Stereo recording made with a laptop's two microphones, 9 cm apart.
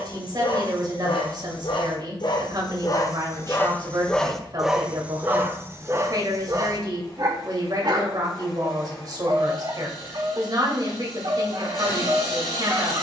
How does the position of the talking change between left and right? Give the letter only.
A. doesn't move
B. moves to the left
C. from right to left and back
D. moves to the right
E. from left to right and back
A.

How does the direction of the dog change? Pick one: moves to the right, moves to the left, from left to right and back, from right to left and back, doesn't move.
moves to the right.